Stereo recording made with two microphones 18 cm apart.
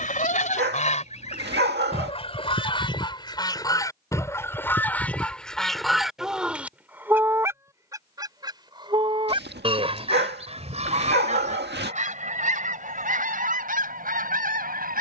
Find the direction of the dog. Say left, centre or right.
right.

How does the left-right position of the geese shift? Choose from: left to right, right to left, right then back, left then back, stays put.
left to right.